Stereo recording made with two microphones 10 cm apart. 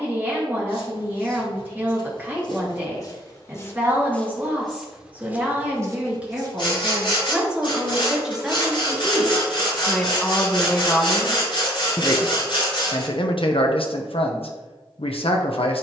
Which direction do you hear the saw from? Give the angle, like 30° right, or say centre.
50° left.